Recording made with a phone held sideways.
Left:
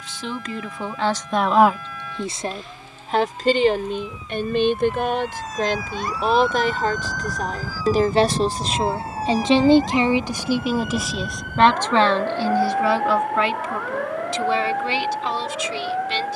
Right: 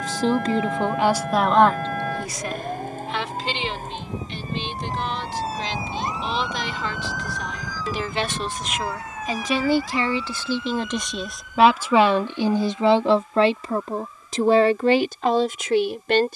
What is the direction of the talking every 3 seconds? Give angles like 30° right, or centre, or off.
10° right, 50° left, 40° left, 10° left, 30° right, 60° right.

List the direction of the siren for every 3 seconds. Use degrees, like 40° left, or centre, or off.
60° right, 40° right, centre, 50° left, 70° left, 70° left.